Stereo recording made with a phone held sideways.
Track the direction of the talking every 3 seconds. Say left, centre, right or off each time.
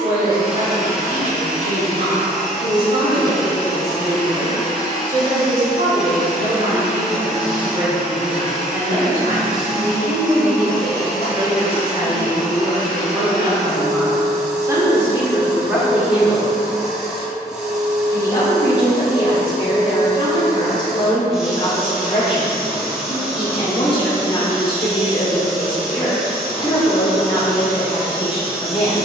right, right, right, right, right, centre, left, left, left, left.